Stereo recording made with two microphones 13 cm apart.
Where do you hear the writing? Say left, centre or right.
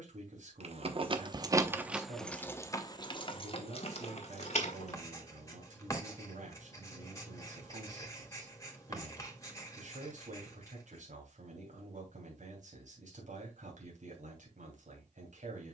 left.